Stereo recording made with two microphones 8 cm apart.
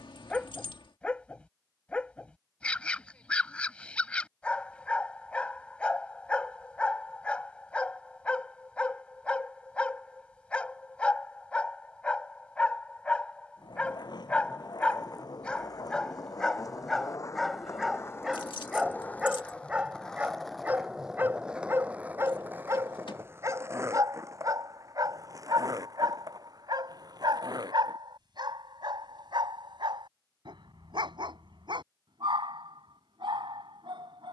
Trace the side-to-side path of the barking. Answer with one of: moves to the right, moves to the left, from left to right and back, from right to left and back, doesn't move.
moves to the right.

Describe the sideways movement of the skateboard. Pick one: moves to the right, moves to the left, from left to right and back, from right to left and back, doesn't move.
moves to the right.